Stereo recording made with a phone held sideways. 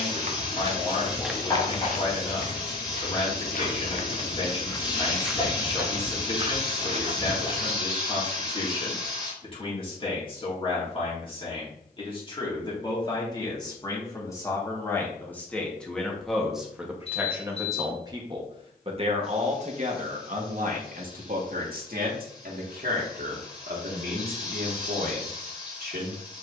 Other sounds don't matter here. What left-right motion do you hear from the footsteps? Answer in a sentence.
You can hear the footsteps go left and come back.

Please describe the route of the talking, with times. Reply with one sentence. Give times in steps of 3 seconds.
In this clip you hear the talking on the left from 0 s, in the centre from 15 s and on the right from 18 s.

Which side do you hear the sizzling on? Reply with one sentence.
You can hear the sizzling on the left.